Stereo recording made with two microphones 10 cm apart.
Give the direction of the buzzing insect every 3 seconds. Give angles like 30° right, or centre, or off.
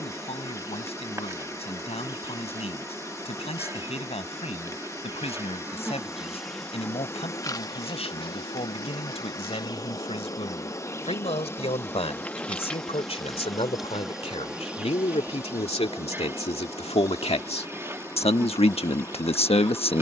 30° right, 30° right, 30° left, 30° left, centre, 20° right, 20° right.